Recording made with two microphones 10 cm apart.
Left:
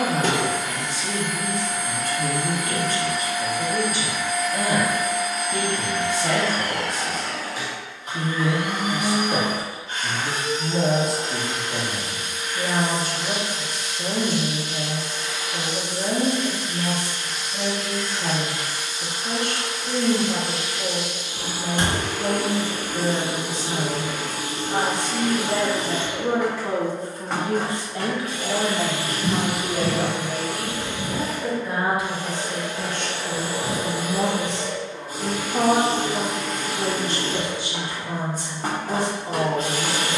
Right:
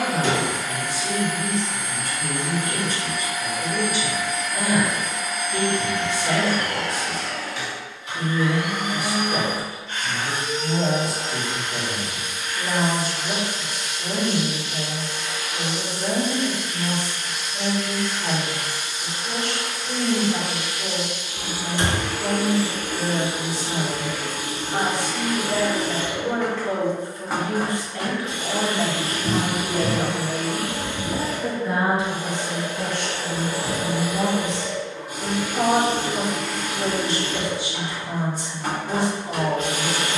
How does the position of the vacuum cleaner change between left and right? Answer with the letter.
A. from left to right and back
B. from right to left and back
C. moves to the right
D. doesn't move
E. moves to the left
A.